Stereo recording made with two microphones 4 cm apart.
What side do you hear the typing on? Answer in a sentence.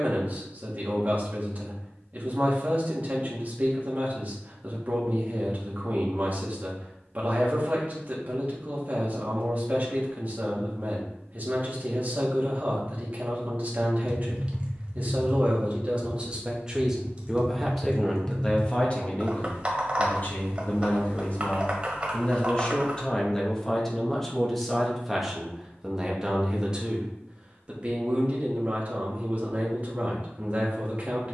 You can hear the typing on the right.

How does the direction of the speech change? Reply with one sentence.
You can hear the speech move from right to left and back again.